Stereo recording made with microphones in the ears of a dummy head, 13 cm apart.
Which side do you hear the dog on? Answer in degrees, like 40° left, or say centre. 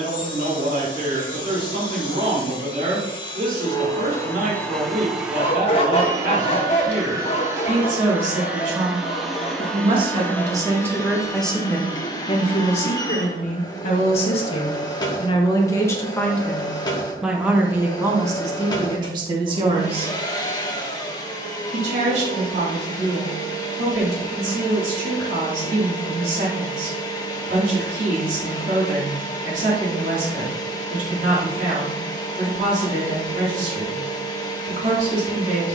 40° left.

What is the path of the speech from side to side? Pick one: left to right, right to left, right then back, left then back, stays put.
left then back.